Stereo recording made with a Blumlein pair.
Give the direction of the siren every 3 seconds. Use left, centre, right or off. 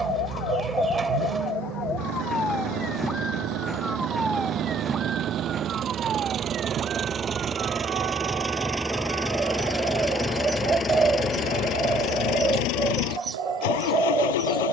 left, centre, right, right, right.